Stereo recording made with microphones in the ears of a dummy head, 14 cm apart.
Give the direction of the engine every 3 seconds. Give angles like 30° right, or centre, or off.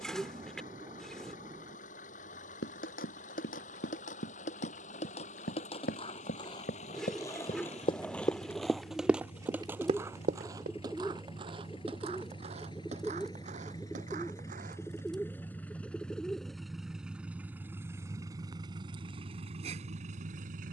50° left, 50° left, 40° left, 40° left, 20° left, centre, 40° right.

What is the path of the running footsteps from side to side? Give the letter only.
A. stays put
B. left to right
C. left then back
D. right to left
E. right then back
B.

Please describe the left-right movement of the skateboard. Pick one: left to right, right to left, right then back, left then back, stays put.
left to right.